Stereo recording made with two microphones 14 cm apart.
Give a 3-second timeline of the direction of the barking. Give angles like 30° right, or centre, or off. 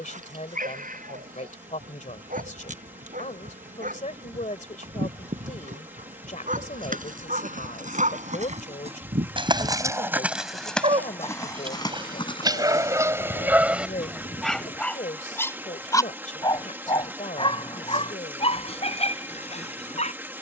80° right, 80° right, 70° right, 50° right, 10° right, 30° left, 50° left.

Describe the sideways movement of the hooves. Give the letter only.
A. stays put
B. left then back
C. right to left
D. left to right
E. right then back
C.